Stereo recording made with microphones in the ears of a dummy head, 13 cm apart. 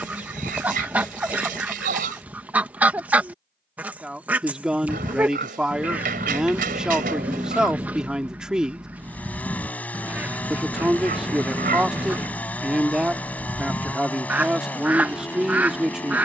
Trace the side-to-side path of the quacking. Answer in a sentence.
In this clip you hear the quacking stay put.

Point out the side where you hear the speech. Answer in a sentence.
In this clip you hear the speech in the centre.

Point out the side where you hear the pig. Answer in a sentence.
You can hear the pig on the right.